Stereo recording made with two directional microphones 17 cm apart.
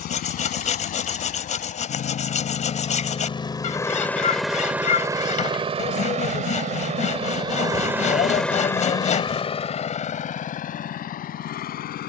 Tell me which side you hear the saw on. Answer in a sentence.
You can hear the saw on the left.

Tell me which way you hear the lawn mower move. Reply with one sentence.
In this clip you hear the lawn mower go right and come back.